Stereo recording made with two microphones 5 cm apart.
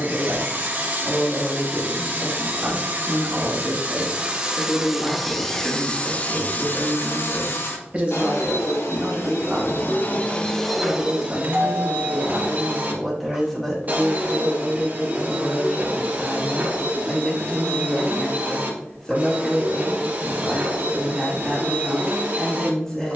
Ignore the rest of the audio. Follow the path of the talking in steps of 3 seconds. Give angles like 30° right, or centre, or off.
10° left, 20° right, 30° right, 10° right, centre, 10° left, 10° left, 10° left.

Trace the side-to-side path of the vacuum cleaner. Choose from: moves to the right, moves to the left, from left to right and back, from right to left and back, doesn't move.
from right to left and back.